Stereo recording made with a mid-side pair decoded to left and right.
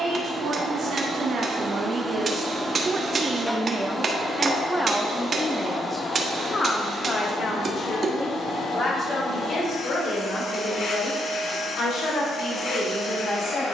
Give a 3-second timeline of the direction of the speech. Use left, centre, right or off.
right, centre, left, left, left.